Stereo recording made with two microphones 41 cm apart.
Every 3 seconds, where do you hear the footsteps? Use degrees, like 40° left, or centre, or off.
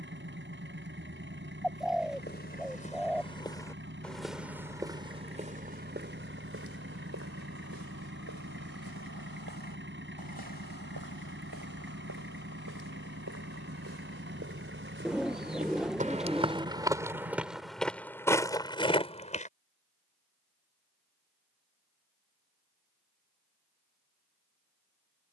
20° left, centre, 40° right, 60° right, 40° right, 10° right, 10° left, off, off.